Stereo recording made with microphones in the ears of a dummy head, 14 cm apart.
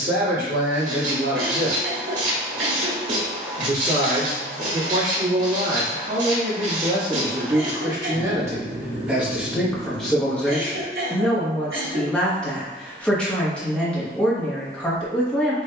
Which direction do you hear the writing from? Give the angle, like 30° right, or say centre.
60° right.